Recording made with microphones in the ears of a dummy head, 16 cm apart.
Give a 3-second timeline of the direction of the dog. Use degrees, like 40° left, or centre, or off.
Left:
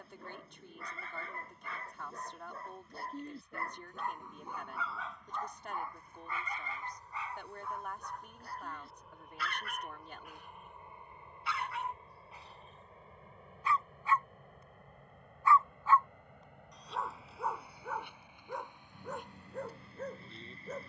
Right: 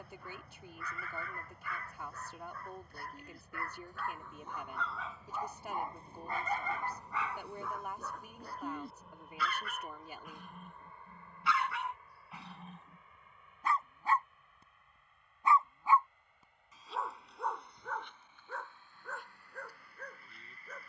20° left, 10° left, 60° right, 70° right, 40° right, centre, 20° left.